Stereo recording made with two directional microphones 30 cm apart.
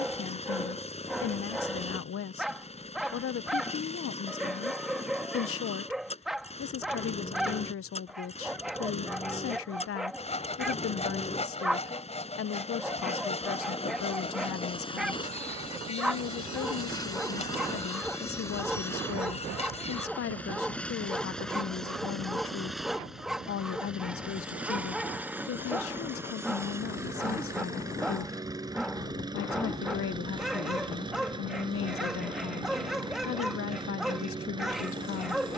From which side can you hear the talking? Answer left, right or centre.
left.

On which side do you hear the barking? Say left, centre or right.
centre.